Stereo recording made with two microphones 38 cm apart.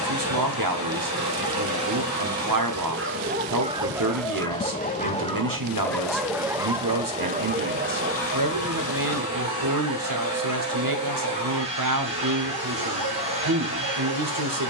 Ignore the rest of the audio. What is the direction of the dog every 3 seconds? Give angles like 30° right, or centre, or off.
50° right, centre, 20° right, 50° right, 60° right.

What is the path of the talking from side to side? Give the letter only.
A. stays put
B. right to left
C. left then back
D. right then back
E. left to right
A.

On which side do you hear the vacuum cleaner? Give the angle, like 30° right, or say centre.
20° right.